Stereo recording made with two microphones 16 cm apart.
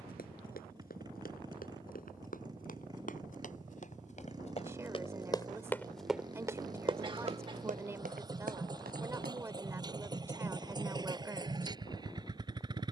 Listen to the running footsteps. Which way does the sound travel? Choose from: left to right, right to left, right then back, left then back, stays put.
left to right.